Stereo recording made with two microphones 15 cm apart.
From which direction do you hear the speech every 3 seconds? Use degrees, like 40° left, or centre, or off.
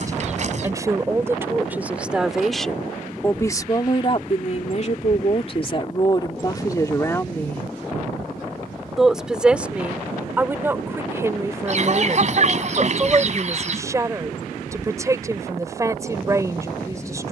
10° right, 40° left, 20° left, 10° right, 20° right, 20° right.